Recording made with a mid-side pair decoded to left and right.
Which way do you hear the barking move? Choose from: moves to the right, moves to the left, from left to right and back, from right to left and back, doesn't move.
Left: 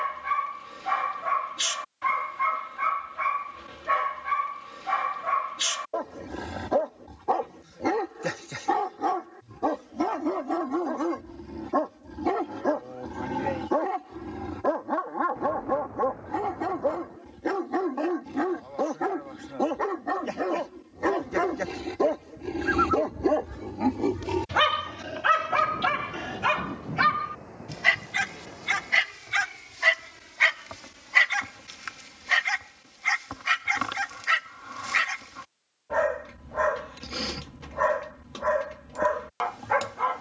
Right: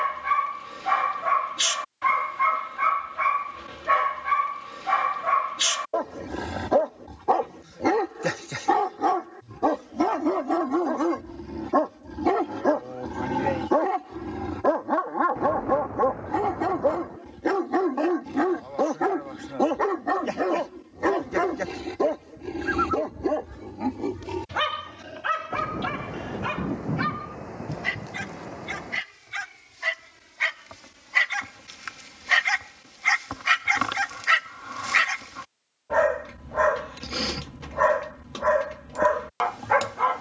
from right to left and back.